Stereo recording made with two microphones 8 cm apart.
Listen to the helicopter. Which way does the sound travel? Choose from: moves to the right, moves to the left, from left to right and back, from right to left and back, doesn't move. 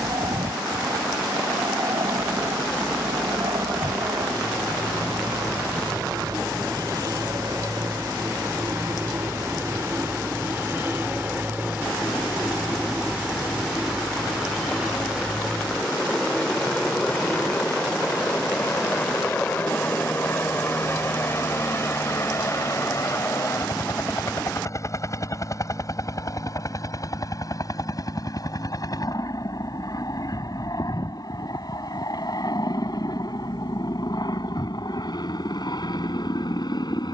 moves to the left.